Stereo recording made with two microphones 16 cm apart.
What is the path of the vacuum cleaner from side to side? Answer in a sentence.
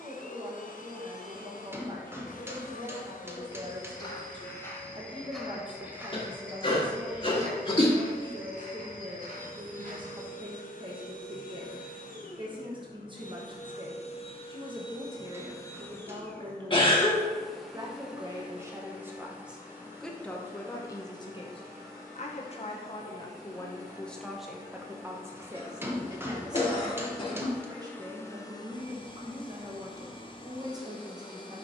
In this clip you hear the vacuum cleaner move from left to right and back again.